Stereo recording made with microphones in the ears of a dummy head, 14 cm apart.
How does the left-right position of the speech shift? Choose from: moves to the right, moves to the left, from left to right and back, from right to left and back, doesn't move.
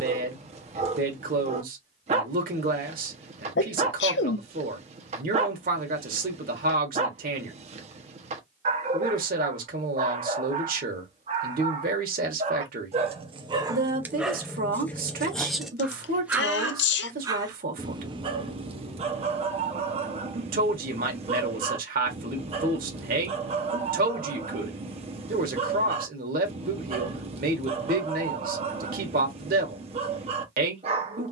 doesn't move.